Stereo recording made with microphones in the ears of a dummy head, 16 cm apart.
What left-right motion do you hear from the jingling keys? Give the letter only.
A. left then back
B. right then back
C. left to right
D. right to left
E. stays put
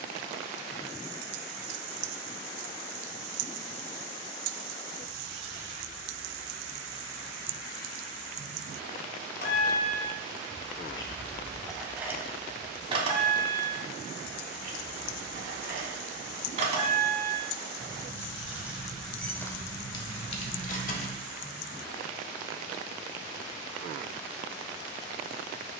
B.